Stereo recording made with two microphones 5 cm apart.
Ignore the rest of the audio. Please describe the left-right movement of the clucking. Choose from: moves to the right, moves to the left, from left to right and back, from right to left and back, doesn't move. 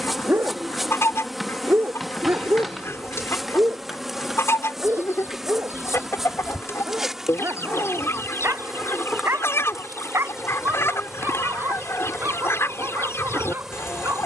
doesn't move.